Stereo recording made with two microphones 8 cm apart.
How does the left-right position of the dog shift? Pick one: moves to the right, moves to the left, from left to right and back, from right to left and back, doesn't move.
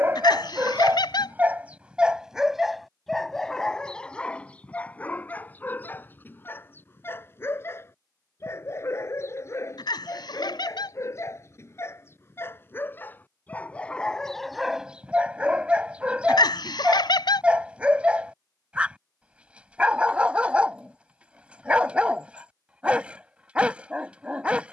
from right to left and back.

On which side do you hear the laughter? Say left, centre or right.
left.